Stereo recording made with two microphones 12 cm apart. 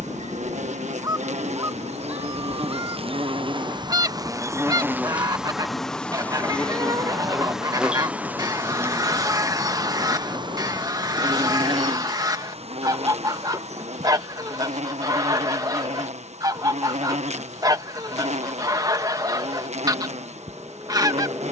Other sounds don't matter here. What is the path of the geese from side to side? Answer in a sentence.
In this clip you hear the geese stay in one place.